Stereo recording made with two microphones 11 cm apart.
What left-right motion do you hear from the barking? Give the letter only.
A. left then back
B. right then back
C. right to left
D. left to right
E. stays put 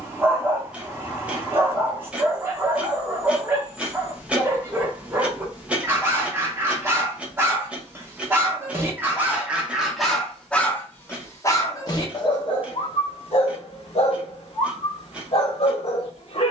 C.